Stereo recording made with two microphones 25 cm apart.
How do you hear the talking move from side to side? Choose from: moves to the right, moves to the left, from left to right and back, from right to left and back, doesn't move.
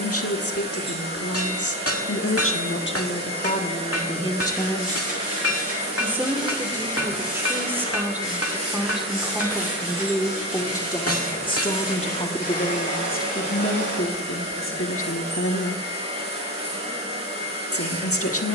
from left to right and back.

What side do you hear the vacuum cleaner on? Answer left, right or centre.
right.